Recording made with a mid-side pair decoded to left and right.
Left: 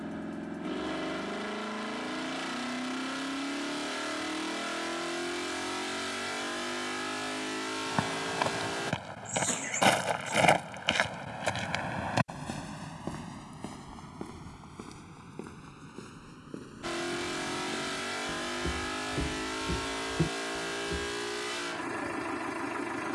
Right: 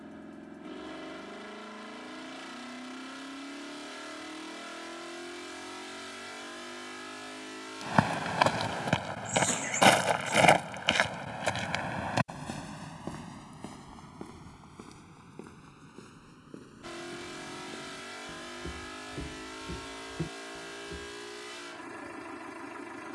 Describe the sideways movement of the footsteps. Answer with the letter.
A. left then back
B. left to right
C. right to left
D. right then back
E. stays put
C.